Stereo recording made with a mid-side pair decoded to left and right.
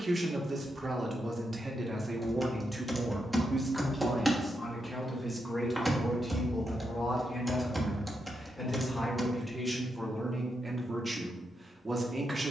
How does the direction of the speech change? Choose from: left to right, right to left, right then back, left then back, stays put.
left then back.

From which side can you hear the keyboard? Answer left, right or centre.
centre.